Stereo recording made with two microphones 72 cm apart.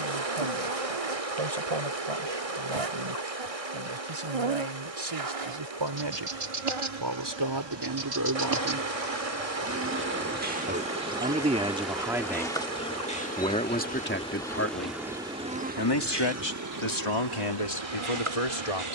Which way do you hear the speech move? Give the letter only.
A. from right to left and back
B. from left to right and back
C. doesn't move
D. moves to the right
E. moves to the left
E.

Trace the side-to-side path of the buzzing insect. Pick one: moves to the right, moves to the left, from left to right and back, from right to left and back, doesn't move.
from right to left and back.